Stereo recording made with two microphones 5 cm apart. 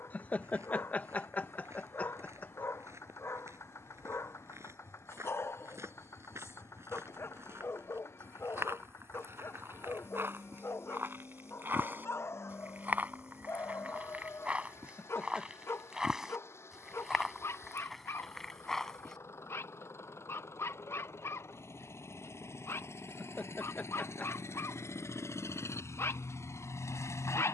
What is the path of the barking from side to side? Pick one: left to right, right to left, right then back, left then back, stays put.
stays put.